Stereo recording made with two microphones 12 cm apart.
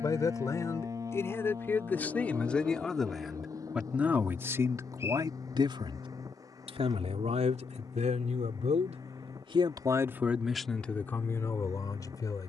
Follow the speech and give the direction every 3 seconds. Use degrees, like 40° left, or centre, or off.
20° left, 20° right, 70° right, centre.